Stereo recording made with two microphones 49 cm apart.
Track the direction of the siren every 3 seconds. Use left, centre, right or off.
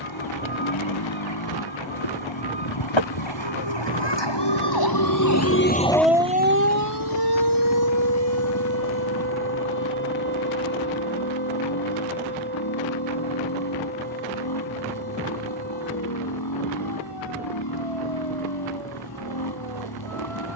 left, left, right, right, right, right, right.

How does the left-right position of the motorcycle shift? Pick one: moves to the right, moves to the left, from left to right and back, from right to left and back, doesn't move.
doesn't move.